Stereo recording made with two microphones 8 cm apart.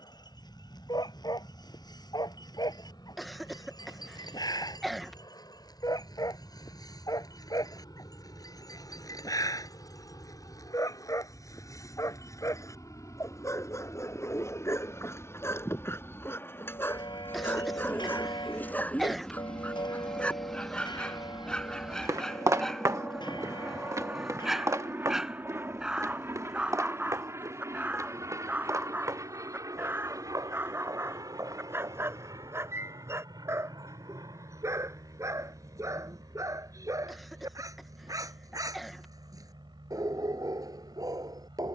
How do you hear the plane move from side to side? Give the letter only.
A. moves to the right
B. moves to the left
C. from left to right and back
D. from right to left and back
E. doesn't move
A.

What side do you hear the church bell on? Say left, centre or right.
left.